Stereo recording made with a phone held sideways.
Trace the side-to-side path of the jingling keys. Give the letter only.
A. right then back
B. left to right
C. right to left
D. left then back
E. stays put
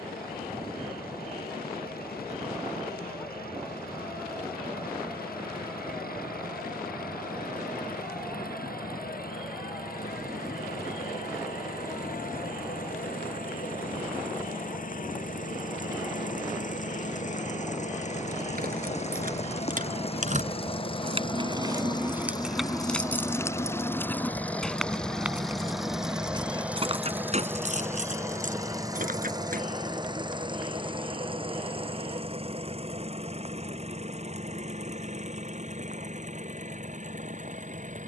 D.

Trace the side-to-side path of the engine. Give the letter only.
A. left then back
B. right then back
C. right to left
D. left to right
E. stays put
D.